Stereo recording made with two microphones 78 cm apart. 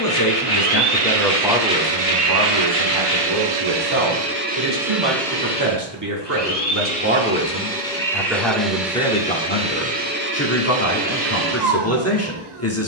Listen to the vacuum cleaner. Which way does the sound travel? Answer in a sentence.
You can hear the vacuum cleaner go left and come back.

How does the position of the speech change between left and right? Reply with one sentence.
You can hear the speech move from left to right and back again.